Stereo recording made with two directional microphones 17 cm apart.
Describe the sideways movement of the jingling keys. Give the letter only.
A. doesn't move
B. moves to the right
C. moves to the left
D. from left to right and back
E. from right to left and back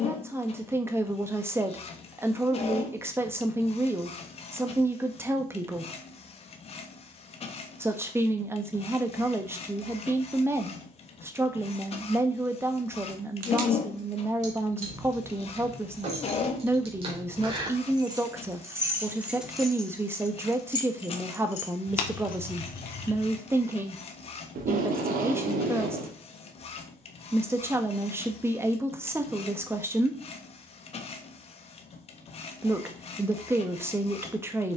C.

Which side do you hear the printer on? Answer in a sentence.
In this clip you hear the printer on the left.